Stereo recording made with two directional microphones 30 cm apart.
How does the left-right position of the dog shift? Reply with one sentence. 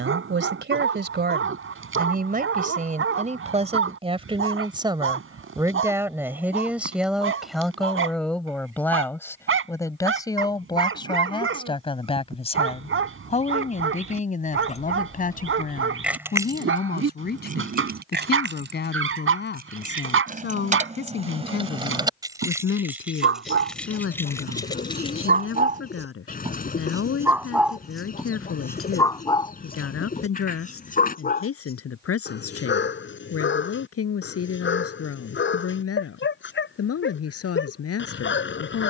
You can hear the dog move from right to left.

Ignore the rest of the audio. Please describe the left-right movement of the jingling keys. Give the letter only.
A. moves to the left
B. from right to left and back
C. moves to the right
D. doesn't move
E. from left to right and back
E.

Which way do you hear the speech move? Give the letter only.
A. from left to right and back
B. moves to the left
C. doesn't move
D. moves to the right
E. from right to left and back
B.